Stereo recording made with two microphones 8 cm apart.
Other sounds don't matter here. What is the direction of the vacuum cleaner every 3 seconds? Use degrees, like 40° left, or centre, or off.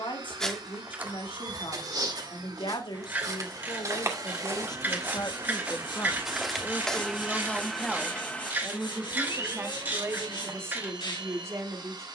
60° right, 40° right, 10° right, 50° right.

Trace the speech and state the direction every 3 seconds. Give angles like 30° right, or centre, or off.
80° left, 50° left, 10° left, 30° right.